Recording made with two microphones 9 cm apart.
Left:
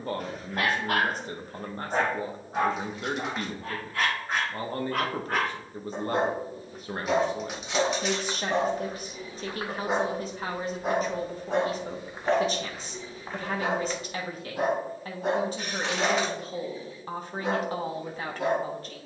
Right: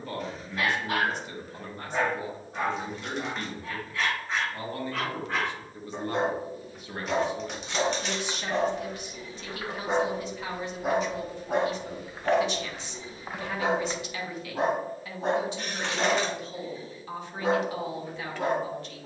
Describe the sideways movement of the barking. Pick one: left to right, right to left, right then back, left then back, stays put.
left to right.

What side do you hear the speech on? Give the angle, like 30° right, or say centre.
40° left.